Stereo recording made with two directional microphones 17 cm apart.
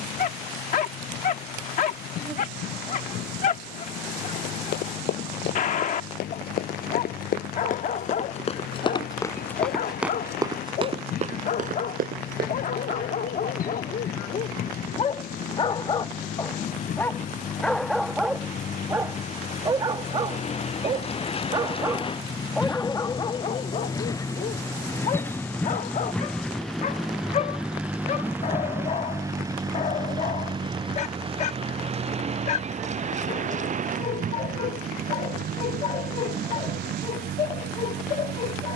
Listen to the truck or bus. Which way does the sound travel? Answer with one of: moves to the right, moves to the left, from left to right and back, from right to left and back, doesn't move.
moves to the right.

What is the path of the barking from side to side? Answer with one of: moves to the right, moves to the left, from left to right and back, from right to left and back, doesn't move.
from left to right and back.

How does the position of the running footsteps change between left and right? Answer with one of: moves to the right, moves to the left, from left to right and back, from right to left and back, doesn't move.
moves to the right.